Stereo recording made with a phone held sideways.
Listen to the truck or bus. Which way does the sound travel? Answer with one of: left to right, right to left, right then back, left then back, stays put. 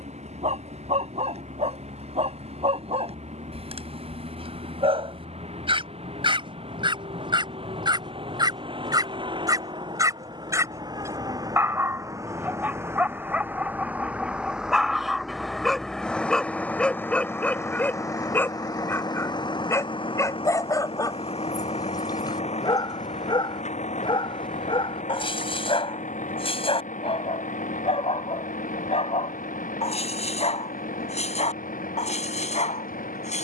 right to left.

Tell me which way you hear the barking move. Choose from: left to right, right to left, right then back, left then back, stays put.
right to left.